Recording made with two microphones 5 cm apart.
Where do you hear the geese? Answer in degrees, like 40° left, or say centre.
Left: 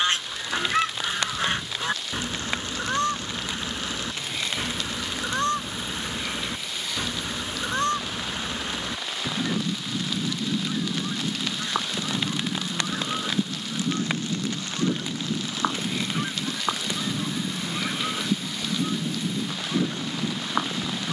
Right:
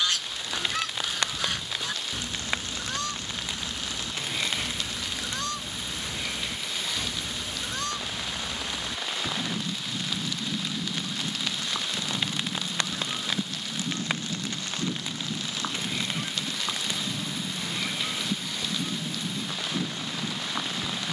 40° left.